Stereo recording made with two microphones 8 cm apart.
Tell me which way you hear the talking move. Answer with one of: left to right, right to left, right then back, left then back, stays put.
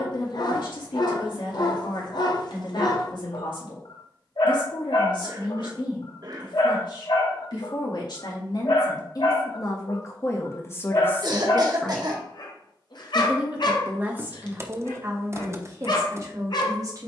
left to right.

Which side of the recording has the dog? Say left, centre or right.
left.